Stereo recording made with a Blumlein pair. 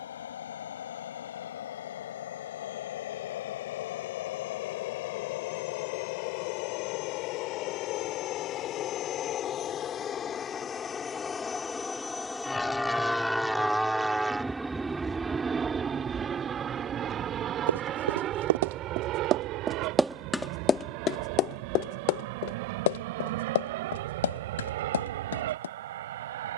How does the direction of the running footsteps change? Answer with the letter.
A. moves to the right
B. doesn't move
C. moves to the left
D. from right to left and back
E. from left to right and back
C.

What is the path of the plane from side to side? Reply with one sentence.
In this clip you hear the plane move to the right.